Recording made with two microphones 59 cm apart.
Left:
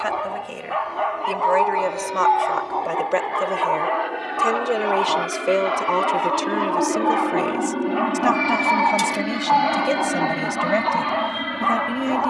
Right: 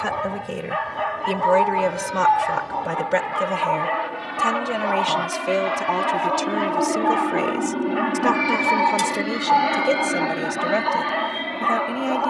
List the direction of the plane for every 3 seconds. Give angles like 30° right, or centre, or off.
50° right, 30° right, centre, 30° left.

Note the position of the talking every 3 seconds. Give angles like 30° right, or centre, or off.
50° right, 20° right, centre, 20° left.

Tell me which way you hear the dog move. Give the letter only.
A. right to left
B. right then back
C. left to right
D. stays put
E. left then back
D.